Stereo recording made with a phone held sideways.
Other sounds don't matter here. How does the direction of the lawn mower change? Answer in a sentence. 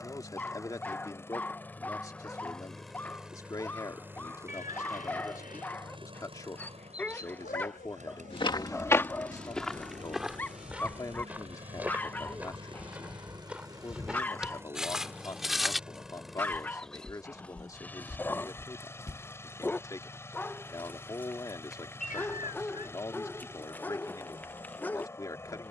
You can hear the lawn mower move from left to right and back again.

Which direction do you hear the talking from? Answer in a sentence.
You can hear the talking on the left.